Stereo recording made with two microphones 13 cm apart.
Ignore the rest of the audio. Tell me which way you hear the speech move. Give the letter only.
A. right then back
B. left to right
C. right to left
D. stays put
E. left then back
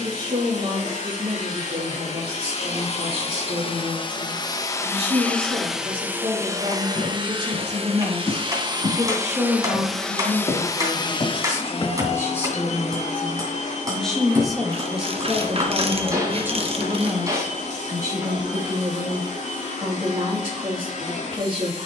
E.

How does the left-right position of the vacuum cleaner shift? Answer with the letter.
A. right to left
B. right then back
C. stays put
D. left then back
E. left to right
B.